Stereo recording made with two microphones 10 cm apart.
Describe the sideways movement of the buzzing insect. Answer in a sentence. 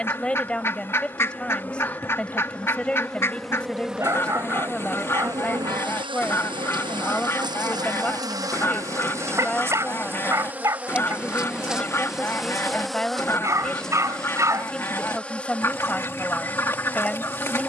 You can hear the buzzing insect move from left to right and back again.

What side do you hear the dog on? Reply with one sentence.
You can hear the dog on the right.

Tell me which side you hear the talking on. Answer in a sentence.
In this clip you hear the talking in the centre.